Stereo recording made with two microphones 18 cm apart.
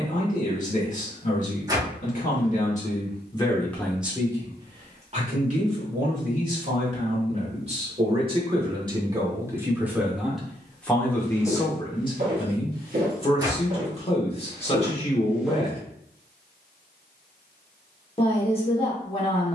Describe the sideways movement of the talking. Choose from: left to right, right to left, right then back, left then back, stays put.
right then back.